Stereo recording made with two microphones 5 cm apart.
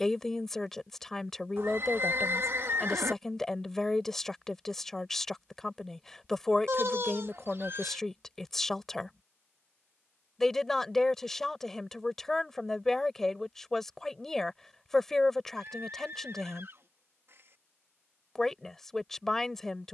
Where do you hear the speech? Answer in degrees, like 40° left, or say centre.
10° left.